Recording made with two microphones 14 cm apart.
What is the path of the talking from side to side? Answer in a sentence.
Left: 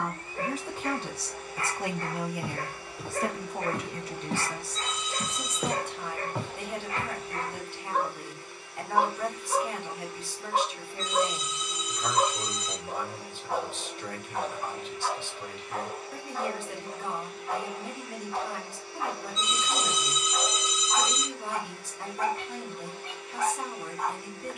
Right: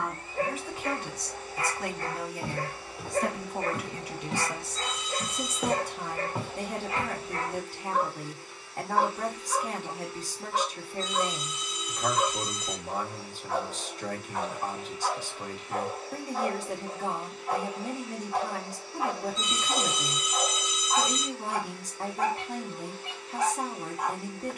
You can hear the talking go from the left side to the right.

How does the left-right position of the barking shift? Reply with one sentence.
You can hear the barking go left and come back.